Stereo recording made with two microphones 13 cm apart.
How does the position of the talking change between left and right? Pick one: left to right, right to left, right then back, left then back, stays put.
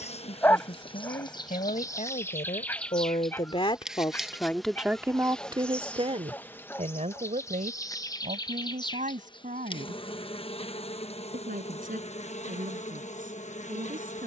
left to right.